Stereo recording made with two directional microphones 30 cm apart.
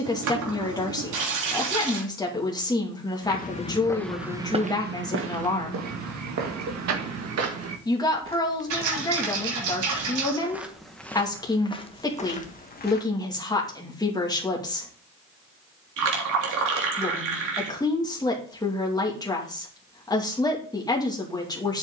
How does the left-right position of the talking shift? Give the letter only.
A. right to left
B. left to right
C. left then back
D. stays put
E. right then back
D.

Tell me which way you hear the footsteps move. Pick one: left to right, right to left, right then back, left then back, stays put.
right then back.